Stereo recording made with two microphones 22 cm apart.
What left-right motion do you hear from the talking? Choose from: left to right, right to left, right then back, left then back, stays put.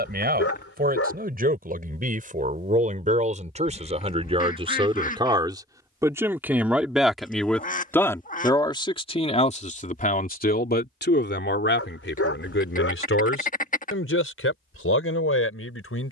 right to left.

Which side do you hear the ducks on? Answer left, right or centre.
left.